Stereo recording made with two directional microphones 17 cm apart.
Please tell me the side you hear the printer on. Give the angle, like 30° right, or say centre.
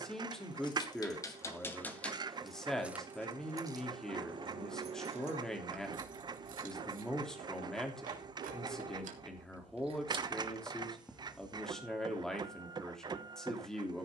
30° right.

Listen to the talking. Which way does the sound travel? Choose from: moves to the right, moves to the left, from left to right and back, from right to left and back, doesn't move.
doesn't move.